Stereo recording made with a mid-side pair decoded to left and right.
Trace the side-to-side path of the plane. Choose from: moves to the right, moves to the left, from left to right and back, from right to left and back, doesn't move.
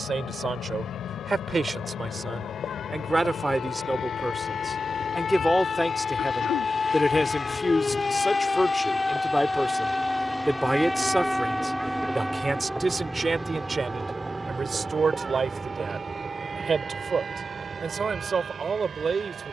moves to the right.